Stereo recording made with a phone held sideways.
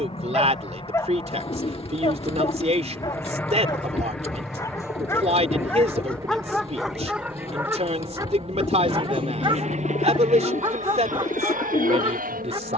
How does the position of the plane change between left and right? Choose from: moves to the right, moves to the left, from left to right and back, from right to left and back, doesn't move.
moves to the right.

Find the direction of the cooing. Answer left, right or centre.
left.